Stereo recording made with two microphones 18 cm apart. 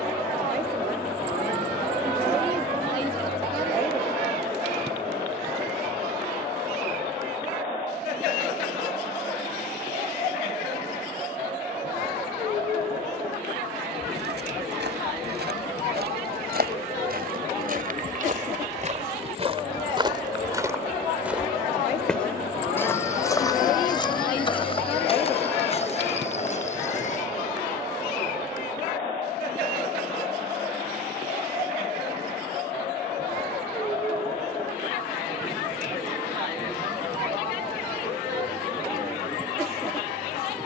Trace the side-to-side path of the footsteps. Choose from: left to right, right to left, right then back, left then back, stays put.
right to left.